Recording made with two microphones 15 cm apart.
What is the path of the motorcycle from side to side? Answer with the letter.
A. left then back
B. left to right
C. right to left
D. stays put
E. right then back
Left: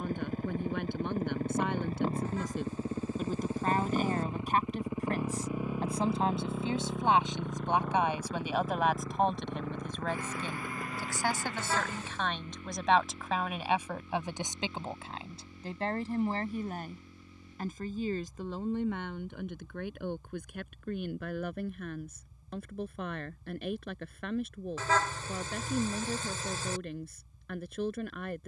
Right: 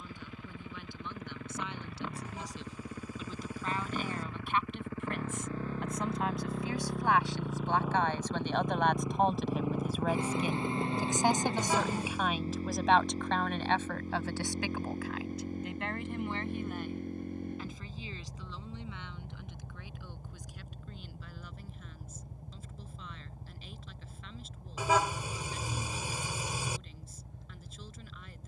B.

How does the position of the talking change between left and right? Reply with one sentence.
In this clip you hear the talking move from left to right and back again.